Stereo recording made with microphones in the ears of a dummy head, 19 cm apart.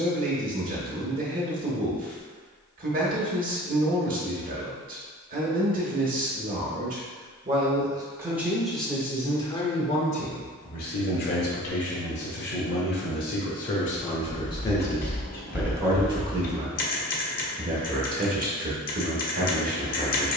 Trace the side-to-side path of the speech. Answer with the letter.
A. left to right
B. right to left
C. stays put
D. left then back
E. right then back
D.